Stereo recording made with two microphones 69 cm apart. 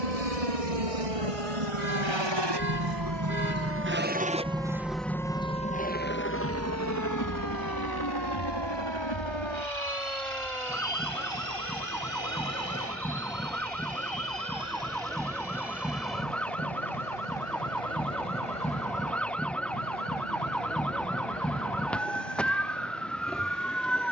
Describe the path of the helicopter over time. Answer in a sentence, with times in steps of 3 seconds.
In this clip you hear the helicopter on the right from 0 s, in the centre from 3 s and on the left from 6 s.